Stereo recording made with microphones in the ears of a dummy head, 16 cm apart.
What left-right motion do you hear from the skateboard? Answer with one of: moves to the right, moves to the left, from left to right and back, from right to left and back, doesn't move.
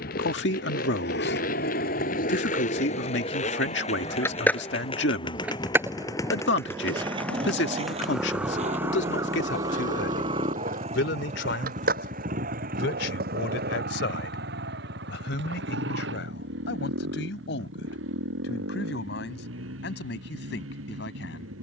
moves to the right.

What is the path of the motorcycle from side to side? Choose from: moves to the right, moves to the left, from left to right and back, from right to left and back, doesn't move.
moves to the right.